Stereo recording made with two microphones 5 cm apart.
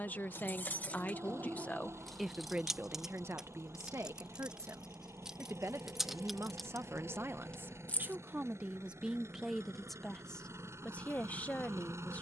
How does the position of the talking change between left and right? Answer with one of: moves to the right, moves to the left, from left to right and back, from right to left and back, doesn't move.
from left to right and back.